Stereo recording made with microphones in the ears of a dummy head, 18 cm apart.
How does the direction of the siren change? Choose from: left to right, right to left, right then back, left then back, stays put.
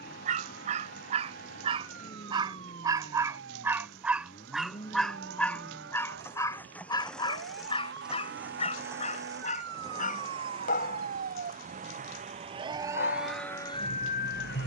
right to left.